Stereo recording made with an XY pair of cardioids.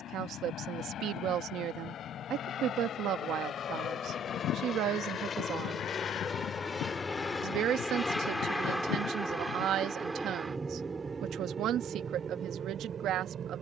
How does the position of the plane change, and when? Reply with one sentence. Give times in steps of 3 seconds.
You can hear the plane on the left from 0 s, in the centre from 6 s and on the right from 9 s.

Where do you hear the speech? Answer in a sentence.
You can hear the speech on the right.